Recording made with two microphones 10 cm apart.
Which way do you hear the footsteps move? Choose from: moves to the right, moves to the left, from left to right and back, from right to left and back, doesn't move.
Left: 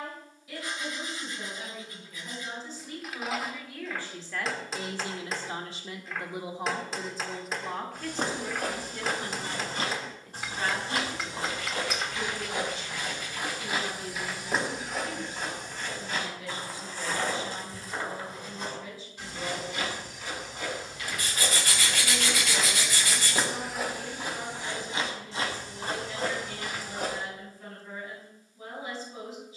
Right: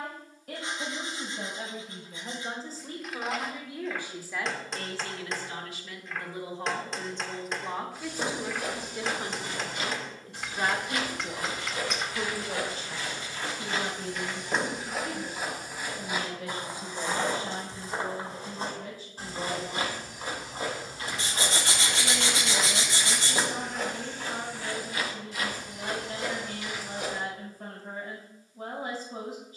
from left to right and back.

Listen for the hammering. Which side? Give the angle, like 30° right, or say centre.
centre.